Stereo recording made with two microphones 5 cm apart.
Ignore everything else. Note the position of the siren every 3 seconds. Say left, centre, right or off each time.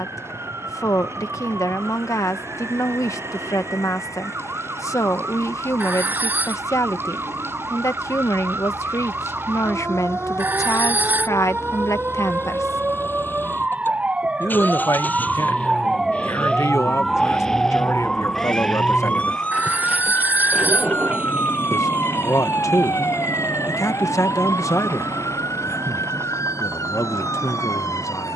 right, right, right, right, right, centre, left, left, left, left.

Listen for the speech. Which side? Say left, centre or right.
left.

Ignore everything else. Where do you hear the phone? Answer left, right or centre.
right.